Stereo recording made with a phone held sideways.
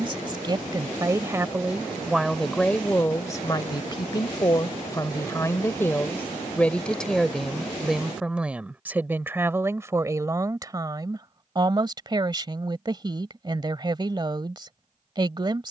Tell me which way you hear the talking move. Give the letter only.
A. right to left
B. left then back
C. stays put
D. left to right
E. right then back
B.